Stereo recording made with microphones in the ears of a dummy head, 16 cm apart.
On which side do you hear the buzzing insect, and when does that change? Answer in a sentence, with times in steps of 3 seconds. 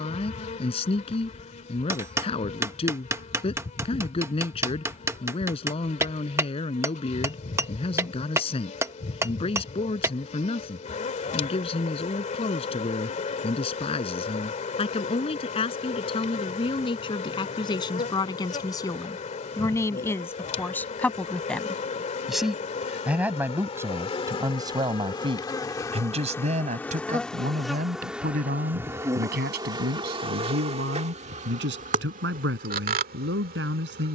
You can hear the buzzing insect on the left from 0 s, in the centre from 27 s and on the right from 30 s.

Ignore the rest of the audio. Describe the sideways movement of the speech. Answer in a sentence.
You can hear the speech go from the left side to the right.